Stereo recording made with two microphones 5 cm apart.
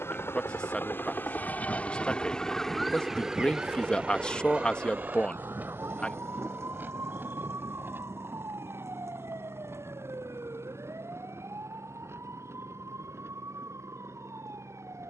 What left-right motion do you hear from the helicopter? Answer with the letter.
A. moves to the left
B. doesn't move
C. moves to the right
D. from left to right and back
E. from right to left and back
C.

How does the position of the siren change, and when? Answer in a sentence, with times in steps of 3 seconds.
You can hear the siren on the left from 0 s and on the right from 3 s.